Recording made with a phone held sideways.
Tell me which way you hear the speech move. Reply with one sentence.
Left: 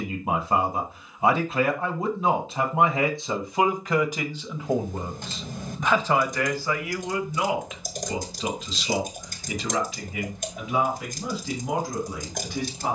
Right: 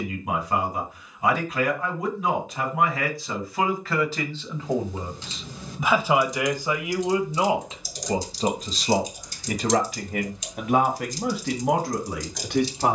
You can hear the speech travel towards the right.